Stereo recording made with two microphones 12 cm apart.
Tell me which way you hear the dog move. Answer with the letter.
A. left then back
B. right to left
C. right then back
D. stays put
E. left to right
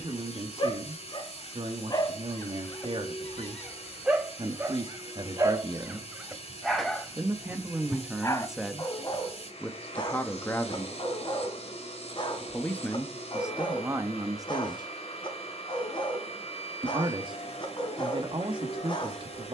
C.